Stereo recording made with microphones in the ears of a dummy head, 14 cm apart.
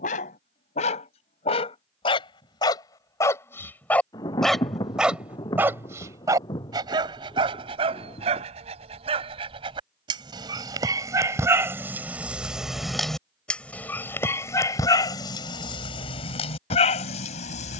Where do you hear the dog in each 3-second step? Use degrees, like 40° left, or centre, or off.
40° left, centre, 30° right, 30° right, 10° left, 40° left.